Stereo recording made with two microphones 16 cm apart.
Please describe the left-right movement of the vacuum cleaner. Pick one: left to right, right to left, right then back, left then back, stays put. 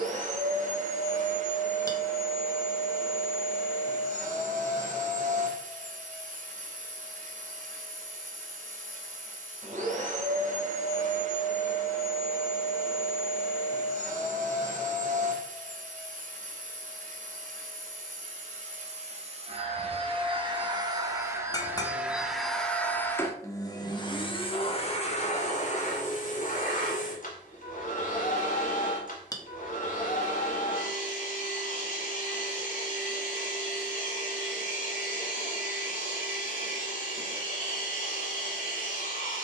right to left.